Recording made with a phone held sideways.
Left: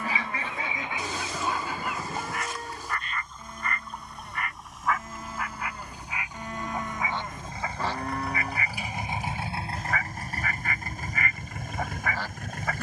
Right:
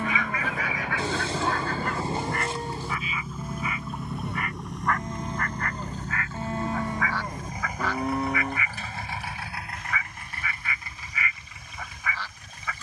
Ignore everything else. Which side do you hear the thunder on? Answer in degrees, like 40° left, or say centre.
30° right.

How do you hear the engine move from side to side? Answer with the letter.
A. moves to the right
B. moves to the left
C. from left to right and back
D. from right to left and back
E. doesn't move
B.